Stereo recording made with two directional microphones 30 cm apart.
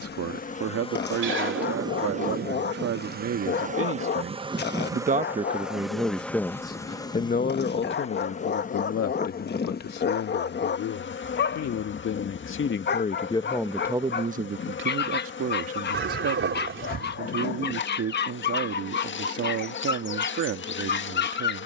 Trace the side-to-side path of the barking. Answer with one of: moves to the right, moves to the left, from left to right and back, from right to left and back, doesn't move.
doesn't move.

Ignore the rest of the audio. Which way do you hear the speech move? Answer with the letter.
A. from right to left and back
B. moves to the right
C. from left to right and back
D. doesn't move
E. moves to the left
A.